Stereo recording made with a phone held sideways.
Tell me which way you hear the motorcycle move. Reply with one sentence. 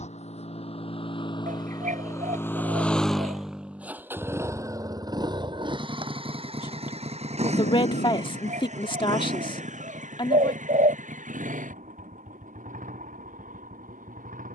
You can hear the motorcycle move from left to right.